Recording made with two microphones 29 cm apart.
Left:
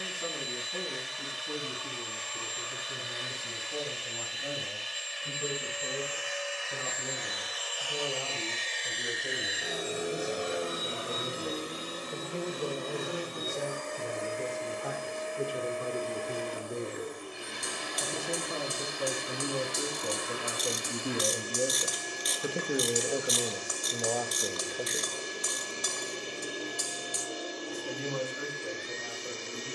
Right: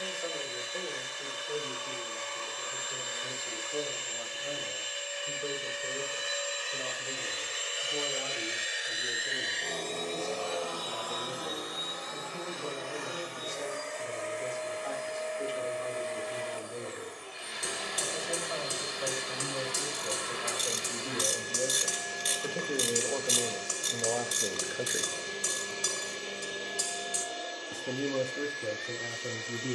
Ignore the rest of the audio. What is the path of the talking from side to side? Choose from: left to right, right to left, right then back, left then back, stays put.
left to right.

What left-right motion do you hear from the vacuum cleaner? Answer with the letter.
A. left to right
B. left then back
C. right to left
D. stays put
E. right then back
C.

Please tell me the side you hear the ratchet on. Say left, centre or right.
right.